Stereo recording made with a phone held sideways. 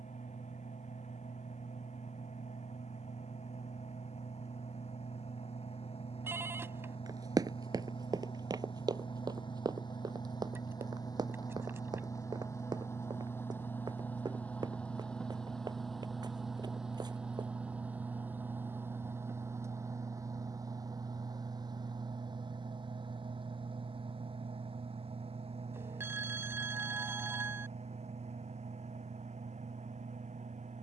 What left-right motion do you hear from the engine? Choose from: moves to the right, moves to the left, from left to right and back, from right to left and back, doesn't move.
moves to the right.